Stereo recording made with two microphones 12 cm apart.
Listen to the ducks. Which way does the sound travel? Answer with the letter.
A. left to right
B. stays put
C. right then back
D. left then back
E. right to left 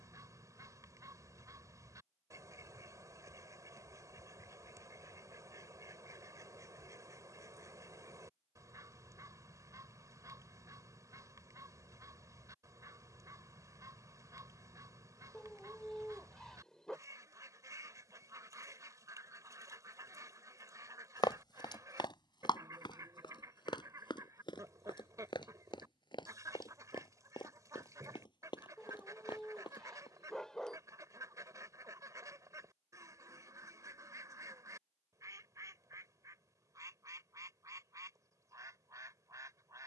B.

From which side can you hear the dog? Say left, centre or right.
centre.